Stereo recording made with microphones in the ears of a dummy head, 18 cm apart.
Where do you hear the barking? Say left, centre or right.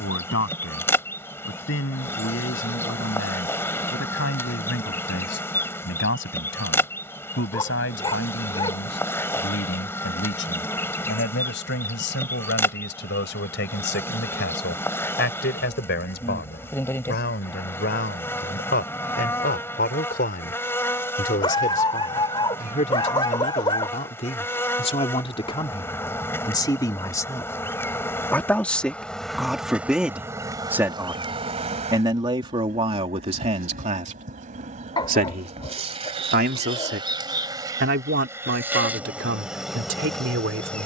left.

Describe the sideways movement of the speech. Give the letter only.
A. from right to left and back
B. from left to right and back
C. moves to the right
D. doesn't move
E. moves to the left
C.